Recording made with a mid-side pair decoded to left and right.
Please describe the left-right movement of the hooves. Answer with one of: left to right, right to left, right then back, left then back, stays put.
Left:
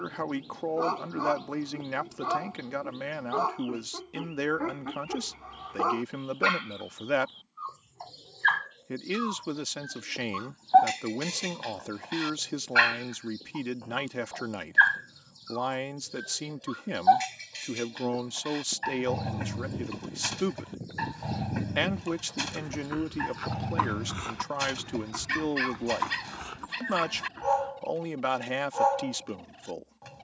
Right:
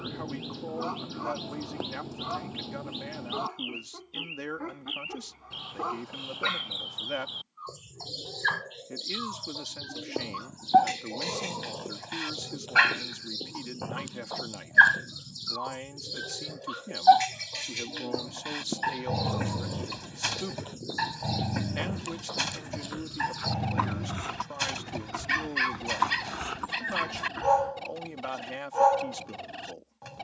left to right.